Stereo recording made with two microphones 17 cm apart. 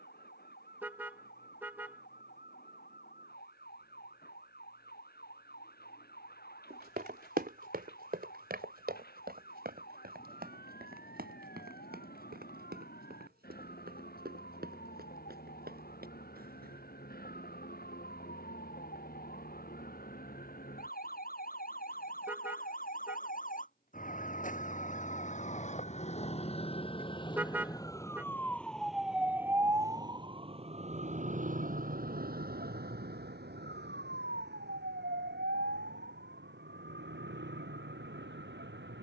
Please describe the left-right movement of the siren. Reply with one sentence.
In this clip you hear the siren move from left to right.